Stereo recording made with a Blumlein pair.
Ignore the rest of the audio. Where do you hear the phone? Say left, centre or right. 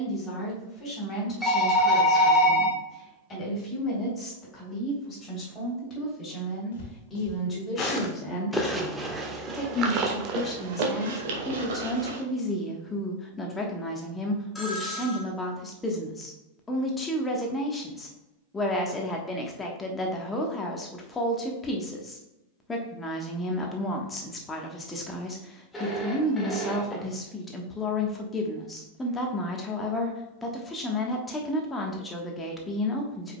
centre.